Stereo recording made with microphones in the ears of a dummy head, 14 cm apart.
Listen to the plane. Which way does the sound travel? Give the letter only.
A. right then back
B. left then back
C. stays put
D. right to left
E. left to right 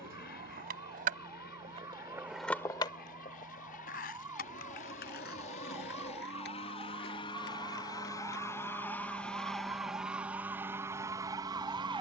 E.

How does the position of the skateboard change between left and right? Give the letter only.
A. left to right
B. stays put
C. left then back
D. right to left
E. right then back
D.